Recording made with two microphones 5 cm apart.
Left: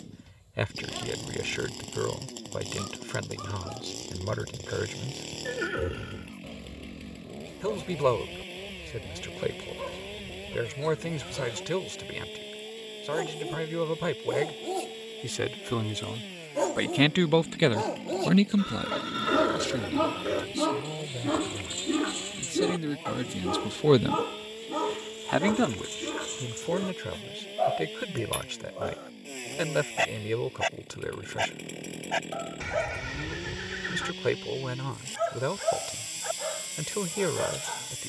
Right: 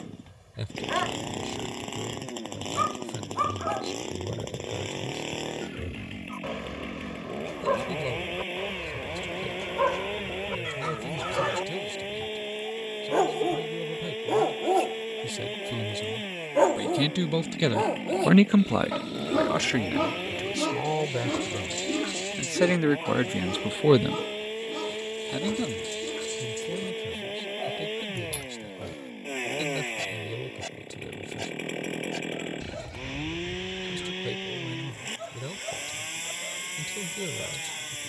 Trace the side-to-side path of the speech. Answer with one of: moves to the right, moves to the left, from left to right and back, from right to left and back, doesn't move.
from left to right and back.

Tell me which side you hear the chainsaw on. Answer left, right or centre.
right.